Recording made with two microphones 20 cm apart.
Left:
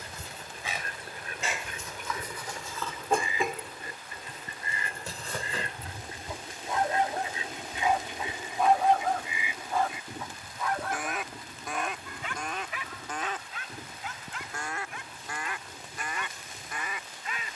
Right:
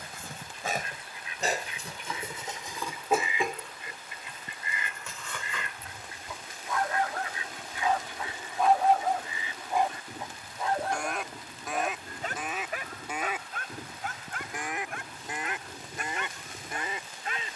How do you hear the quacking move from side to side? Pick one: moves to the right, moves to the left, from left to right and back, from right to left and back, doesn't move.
moves to the right.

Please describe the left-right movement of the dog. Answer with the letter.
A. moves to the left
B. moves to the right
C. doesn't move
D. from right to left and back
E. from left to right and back
D.